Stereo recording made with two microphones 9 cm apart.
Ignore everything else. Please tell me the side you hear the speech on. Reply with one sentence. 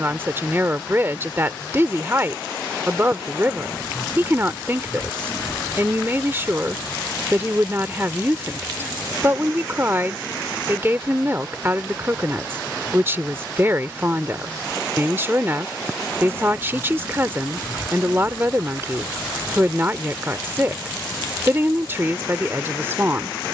You can hear the speech on the right.